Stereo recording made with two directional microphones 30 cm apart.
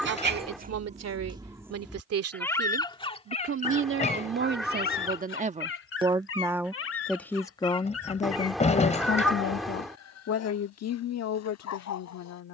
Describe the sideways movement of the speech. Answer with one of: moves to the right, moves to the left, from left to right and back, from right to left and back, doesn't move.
moves to the left.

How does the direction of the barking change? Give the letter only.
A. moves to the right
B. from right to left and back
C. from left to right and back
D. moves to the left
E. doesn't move
D.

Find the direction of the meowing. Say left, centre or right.
centre.